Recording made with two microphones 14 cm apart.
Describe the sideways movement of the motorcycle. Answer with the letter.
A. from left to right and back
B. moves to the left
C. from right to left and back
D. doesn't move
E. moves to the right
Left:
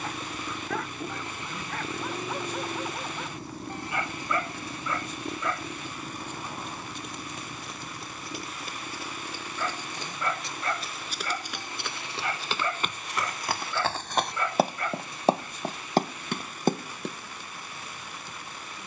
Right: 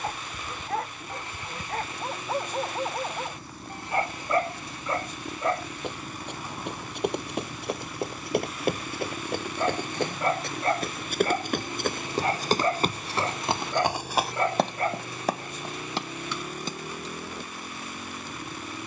E.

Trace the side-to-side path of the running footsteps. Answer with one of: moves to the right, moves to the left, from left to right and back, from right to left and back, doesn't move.
moves to the left.